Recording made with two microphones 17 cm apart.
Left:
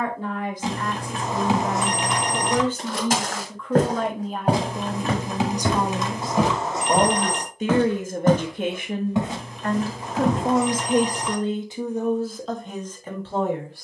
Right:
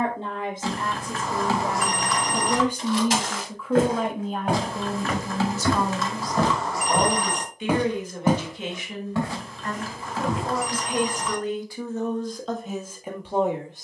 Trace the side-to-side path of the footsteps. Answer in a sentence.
You can hear the footsteps move from left to right and back again.